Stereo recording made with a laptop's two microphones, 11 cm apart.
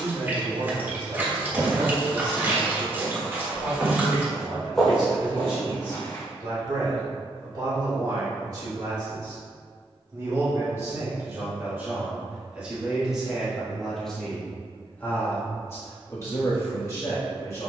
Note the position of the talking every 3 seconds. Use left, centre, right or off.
right, right, right, right, centre, left.